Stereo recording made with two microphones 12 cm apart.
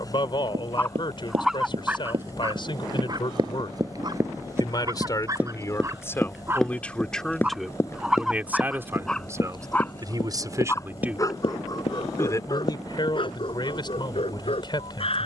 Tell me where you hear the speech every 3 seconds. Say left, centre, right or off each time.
left, left, centre, right, left.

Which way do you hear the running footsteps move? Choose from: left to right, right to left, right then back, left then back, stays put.
right to left.